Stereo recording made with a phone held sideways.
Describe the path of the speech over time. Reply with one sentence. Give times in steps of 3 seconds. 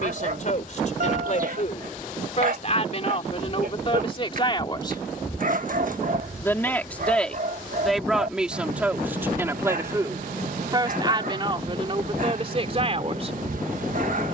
In this clip you hear the speech on the left from 0 s, in the centre from 6 s and on the right from 9 s.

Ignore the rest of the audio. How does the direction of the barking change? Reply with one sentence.
In this clip you hear the barking stay put.